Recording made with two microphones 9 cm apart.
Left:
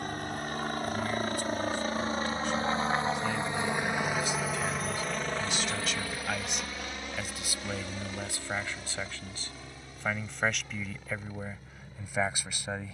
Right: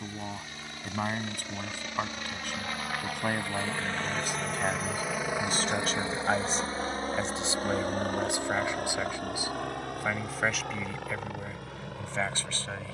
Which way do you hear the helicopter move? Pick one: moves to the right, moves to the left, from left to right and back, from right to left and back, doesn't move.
moves to the right.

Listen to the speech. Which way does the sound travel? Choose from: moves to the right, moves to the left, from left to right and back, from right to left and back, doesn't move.
moves to the left.